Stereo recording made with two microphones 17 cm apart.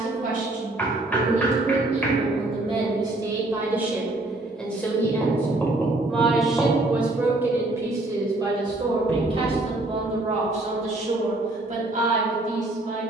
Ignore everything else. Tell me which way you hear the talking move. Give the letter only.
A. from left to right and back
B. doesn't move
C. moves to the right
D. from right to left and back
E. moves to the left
D.